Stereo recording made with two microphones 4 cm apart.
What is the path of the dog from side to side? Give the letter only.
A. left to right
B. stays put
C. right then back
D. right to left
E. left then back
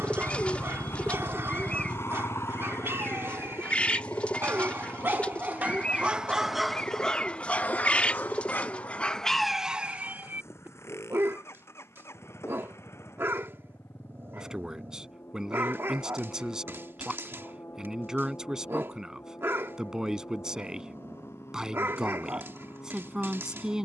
E.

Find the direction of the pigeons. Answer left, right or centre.
left.